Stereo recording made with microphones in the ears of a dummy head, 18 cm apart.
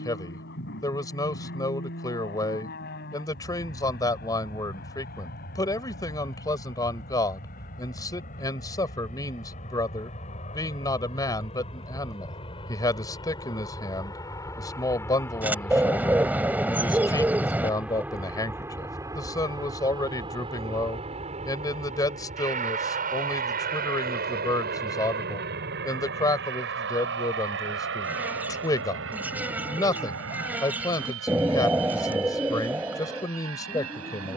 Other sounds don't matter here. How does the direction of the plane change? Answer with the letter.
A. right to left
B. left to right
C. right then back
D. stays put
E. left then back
B.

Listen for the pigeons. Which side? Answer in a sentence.
You can hear the pigeons in the centre.